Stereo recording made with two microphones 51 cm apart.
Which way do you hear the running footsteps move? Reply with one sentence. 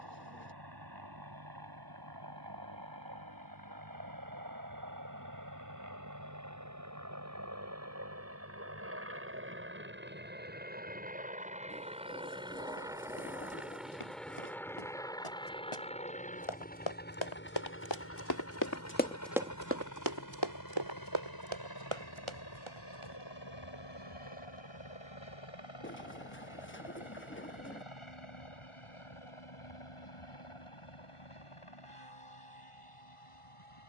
In this clip you hear the running footsteps move from left to right.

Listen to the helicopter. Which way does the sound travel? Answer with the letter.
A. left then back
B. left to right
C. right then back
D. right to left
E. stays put
D.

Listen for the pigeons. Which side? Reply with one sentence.
In this clip you hear the pigeons on the left.